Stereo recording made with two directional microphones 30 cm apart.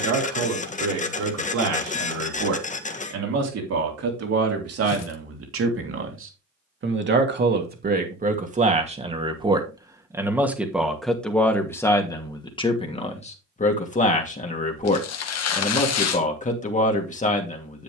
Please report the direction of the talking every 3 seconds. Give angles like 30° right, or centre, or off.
60° right, 50° right, 30° right, centre, 20° left, 20° left.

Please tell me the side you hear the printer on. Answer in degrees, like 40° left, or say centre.
20° left.